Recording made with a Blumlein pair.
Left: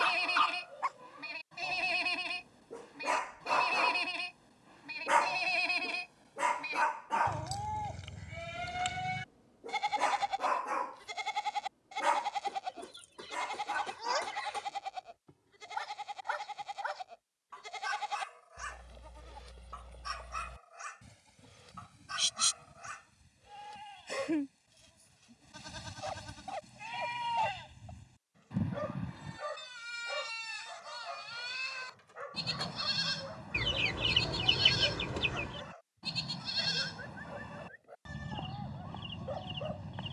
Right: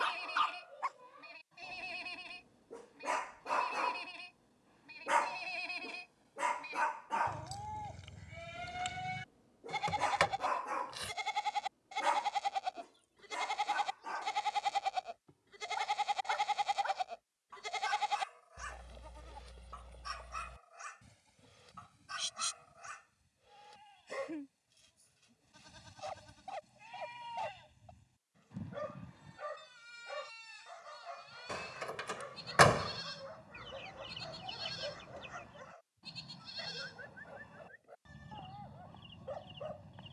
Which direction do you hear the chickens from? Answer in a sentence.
In this clip you hear the chickens on the left.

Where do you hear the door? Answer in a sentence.
In this clip you hear the door on the right.